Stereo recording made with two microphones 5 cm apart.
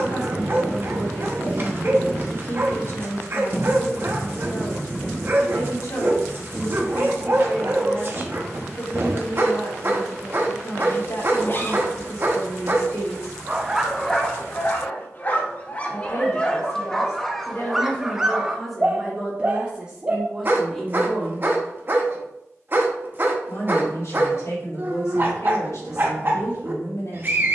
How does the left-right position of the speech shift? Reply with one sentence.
In this clip you hear the speech go right and come back.